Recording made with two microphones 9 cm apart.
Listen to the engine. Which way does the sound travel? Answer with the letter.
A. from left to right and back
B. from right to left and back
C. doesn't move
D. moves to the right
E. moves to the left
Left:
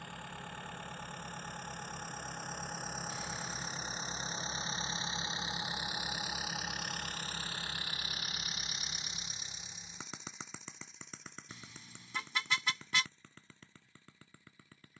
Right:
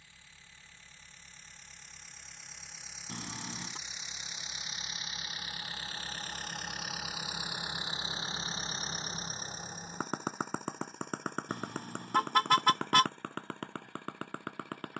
D.